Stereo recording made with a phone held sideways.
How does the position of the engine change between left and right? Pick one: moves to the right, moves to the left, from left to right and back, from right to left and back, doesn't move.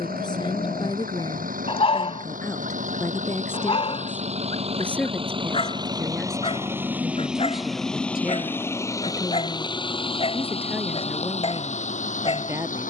moves to the left.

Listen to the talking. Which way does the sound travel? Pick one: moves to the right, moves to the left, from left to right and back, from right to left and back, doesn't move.
moves to the right.